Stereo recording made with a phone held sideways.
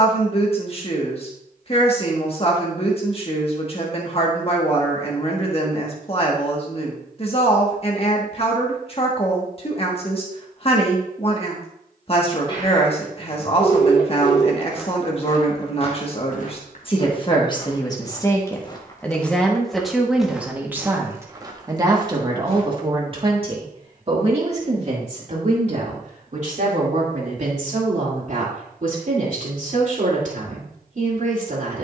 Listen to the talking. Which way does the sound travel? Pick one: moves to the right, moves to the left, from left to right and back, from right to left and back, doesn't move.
moves to the right.